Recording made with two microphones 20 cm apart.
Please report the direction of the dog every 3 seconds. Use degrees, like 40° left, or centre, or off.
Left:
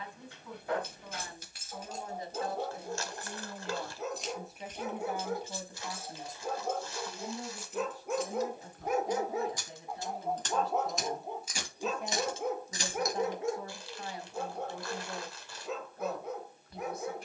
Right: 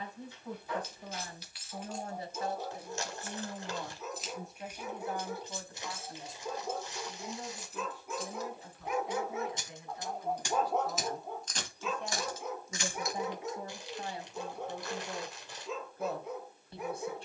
80° left, 80° left, 60° left, 20° left, 60° left, 70° left.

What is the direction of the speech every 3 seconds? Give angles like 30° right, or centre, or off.
40° right, centre, 40° left, 30° left, 20° right, 30° right.